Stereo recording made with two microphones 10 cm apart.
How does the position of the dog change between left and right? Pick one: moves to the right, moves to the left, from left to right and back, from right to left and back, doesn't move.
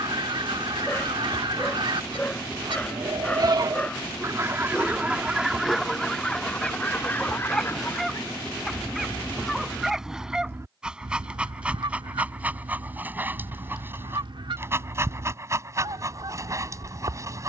moves to the right.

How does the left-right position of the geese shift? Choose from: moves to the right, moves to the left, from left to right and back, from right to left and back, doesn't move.
from right to left and back.